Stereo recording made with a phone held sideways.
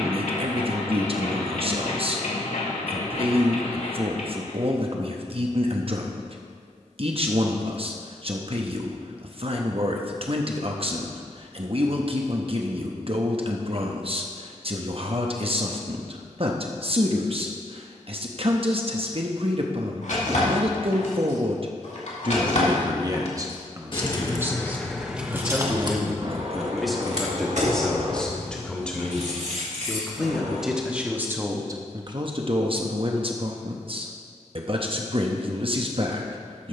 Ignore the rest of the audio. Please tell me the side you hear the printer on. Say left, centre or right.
left.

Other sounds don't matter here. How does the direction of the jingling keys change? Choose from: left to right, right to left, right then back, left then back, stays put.
left to right.